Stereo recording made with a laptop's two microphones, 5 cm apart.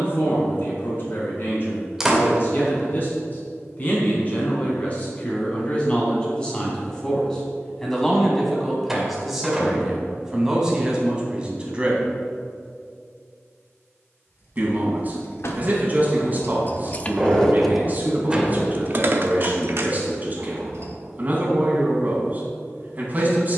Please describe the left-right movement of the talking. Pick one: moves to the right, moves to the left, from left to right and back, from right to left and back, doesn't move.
moves to the right.